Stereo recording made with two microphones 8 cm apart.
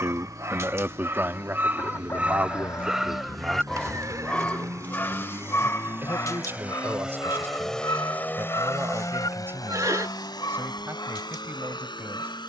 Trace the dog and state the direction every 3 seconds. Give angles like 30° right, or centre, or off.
30° right, 20° left, 50° left, 70° left.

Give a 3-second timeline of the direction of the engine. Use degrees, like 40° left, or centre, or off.
60° right, 40° right, centre, 70° left.